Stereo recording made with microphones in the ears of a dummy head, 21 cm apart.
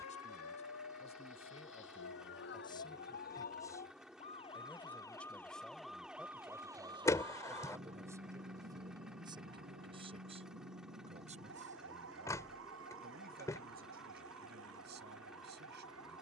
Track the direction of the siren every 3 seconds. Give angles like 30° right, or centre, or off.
60° left, 20° left, 20° right, 50° right, 60° right, 60° right.